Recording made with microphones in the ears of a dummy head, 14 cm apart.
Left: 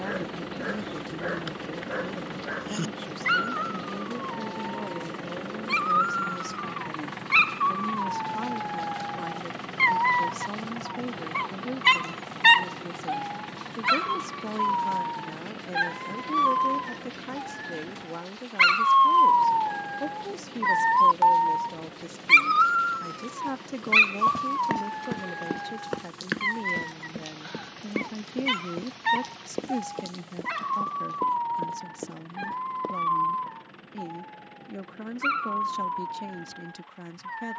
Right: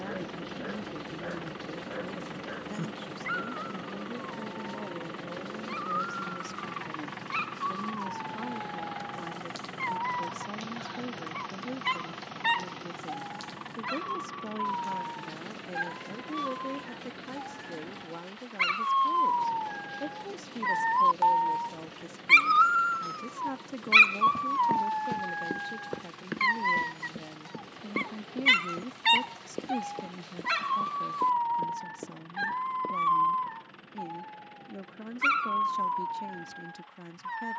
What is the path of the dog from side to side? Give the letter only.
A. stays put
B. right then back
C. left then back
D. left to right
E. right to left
D.